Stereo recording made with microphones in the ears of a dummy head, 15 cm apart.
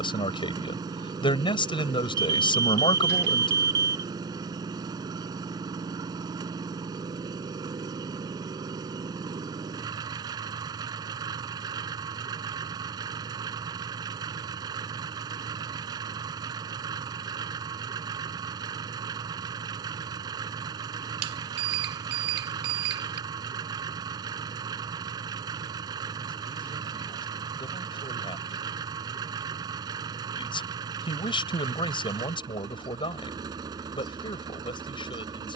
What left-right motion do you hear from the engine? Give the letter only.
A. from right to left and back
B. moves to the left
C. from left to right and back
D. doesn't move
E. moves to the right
D.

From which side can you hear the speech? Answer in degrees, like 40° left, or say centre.
30° left.